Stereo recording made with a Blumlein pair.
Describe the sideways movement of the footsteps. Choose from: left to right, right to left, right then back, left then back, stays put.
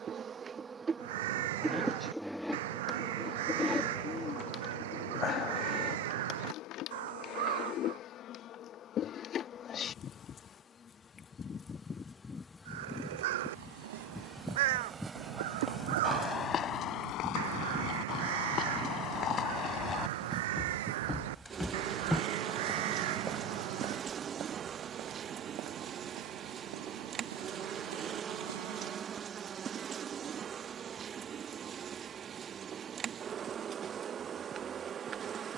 left then back.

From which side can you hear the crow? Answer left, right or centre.
right.